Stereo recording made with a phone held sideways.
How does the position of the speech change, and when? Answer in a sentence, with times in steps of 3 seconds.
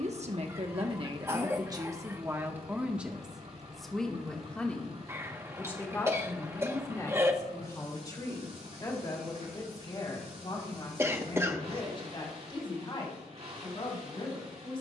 You can hear the speech on the right from 0 s, in the centre from 3 s and on the left from 6 s.